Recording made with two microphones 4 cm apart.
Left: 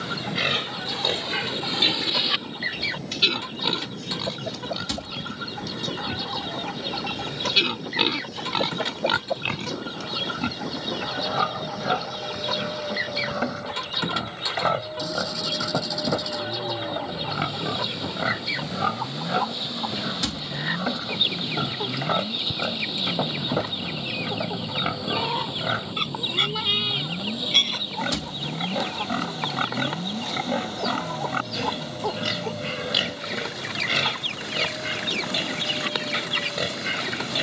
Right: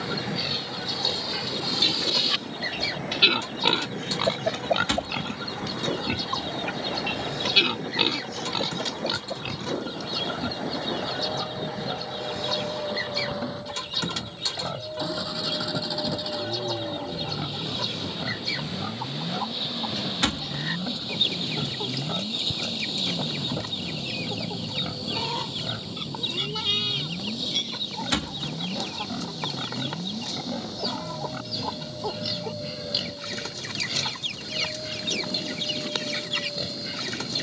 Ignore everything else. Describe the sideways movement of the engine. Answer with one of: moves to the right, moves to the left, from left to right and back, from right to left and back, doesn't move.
moves to the left.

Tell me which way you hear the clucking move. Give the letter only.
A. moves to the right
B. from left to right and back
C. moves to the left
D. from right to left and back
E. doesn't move
E.